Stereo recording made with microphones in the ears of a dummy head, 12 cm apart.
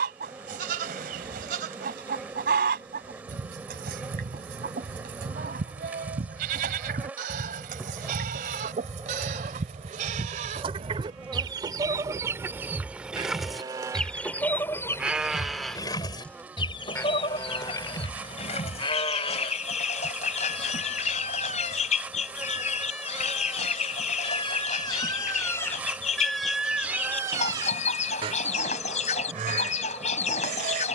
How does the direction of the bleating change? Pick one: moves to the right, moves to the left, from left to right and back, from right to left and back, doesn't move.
from right to left and back.